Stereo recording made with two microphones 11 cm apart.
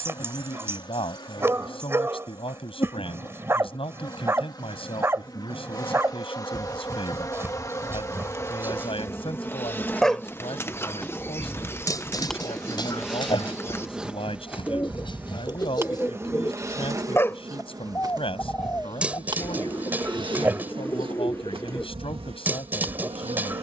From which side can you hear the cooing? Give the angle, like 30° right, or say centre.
20° left.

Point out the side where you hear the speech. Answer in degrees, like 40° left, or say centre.
60° left.